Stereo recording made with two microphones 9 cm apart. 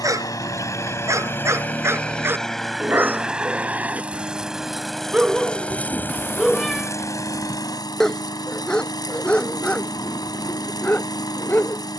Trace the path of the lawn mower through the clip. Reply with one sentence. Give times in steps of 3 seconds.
In this clip you hear the lawn mower on the left from 0 s, in the centre from 3 s and on the left from 6 s.